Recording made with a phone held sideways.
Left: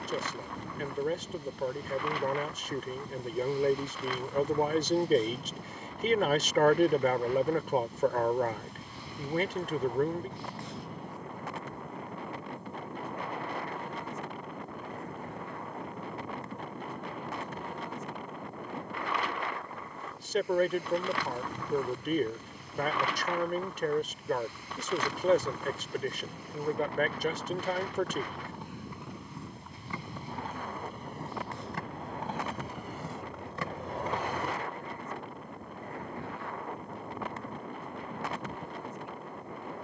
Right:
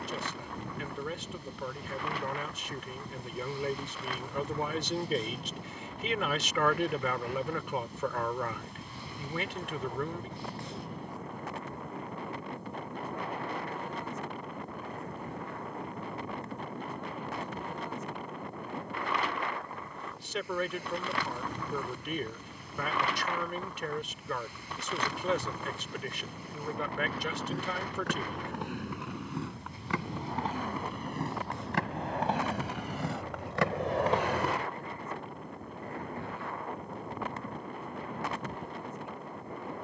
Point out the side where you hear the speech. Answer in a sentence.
You can hear the speech on the left.